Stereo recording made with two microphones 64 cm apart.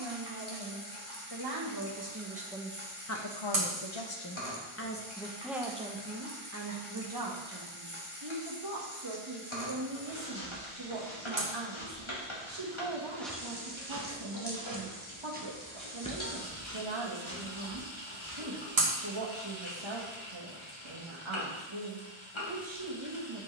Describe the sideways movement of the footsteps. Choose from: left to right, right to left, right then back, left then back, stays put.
right then back.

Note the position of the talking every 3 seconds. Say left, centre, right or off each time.
right, left, right, right, right, right, right, right.